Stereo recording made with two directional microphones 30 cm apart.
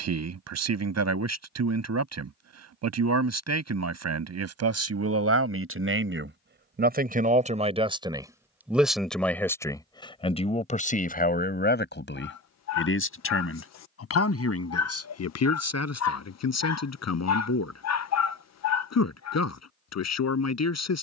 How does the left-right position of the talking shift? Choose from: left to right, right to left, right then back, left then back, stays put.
right to left.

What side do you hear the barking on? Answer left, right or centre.
left.